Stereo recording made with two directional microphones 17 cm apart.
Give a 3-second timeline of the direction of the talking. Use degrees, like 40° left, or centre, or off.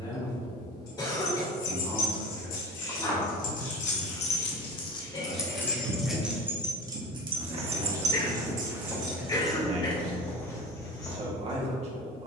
20° left, 10° left, 20° right, 40° right.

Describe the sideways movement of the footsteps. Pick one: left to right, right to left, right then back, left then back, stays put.
right then back.